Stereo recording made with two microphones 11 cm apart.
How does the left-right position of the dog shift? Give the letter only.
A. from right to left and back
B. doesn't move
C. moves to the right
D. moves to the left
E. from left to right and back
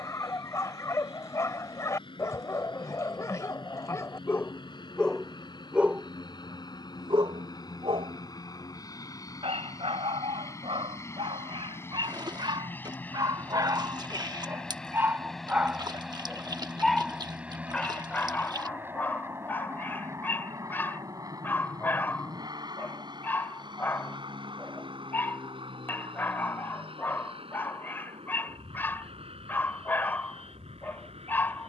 E.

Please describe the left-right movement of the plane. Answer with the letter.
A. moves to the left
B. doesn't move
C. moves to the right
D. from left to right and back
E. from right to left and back
C.